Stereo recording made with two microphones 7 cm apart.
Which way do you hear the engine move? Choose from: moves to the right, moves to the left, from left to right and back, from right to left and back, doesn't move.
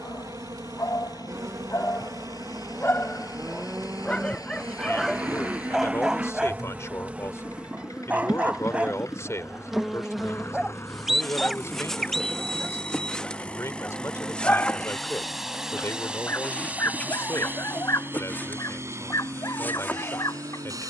moves to the right.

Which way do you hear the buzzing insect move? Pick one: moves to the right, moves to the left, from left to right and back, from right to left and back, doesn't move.
moves to the left.